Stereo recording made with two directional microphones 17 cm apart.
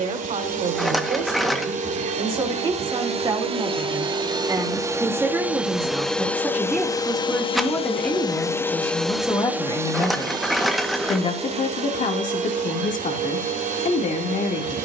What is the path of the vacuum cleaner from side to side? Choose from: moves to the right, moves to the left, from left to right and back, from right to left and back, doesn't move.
from right to left and back.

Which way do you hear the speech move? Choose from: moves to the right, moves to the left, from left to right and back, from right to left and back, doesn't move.
moves to the left.